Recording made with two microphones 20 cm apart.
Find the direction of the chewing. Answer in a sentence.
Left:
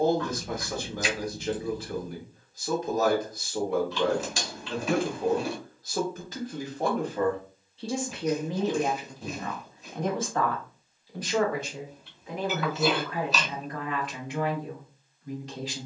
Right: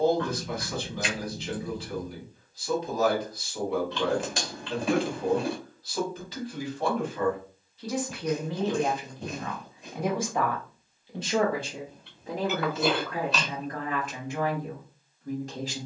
You can hear the chewing on the right.